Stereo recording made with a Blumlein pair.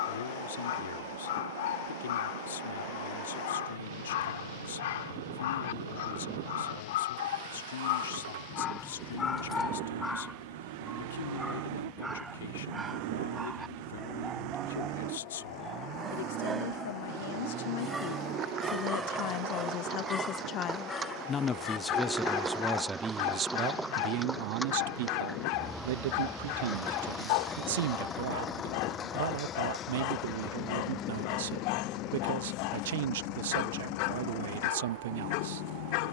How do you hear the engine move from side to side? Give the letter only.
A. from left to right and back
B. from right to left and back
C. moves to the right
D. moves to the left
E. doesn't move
D.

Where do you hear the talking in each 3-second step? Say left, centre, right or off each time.
left, left, left, left, left, left, left, centre, right, right, right, right.